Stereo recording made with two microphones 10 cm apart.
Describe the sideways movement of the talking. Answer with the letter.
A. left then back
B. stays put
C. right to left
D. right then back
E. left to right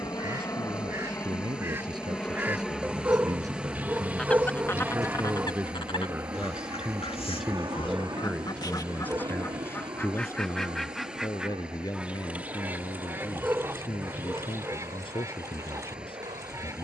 C.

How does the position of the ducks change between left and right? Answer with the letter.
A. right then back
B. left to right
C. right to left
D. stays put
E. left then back
E.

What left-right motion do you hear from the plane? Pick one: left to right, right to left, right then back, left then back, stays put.
left to right.